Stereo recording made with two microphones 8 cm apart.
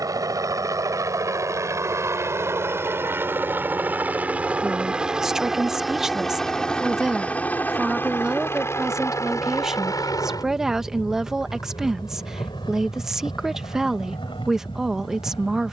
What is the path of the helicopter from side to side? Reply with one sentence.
In this clip you hear the helicopter travel towards the left.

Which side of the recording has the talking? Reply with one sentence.
You can hear the talking in the centre.